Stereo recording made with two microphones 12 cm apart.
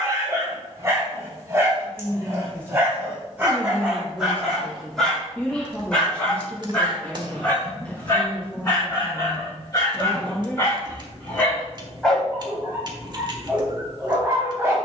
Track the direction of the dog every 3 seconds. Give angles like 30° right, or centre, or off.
20° right, centre, 20° left, 20° left, 10° right.